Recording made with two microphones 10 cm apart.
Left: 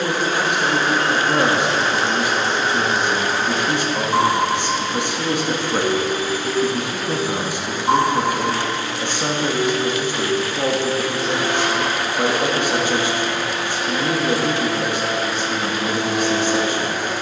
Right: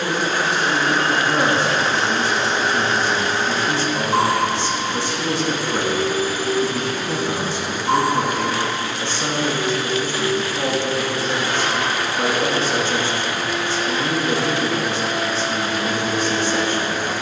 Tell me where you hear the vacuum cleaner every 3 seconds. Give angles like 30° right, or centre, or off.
50° left, centre, 20° left, 60° left, 60° left, 60° left.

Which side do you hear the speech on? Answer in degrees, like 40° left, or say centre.
20° left.